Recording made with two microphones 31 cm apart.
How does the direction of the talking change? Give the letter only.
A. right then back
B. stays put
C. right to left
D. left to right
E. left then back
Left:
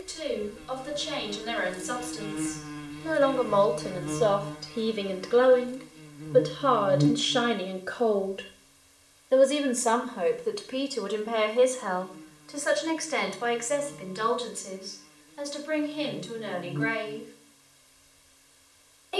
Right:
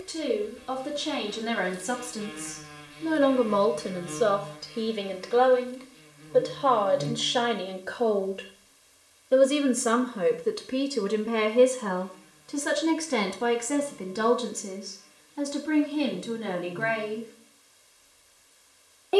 E.